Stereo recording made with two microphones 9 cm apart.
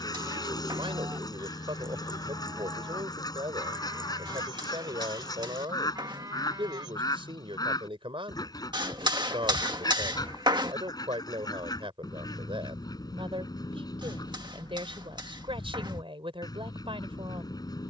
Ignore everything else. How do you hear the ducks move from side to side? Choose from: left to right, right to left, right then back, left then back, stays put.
stays put.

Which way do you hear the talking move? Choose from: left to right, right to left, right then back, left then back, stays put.
stays put.